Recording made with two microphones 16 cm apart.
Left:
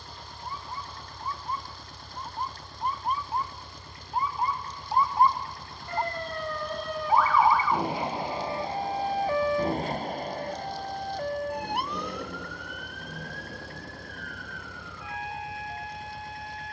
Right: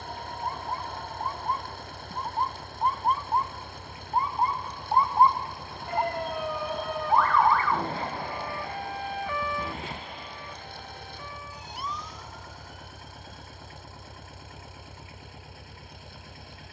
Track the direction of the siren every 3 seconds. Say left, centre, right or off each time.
right, right, centre, left, left, left.